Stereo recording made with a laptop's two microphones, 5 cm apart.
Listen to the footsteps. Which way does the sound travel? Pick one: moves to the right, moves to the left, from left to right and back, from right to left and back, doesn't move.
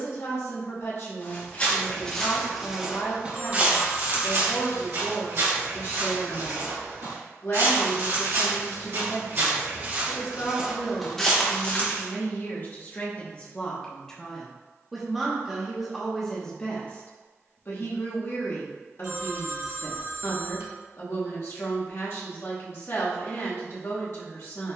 from left to right and back.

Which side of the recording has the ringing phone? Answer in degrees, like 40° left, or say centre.
70° right.